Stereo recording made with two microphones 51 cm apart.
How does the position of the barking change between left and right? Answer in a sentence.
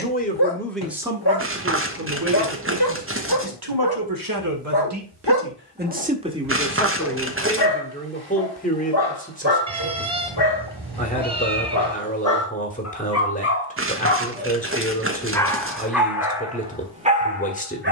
In this clip you hear the barking move from left to right.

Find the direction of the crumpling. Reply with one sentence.
You can hear the crumpling on the right.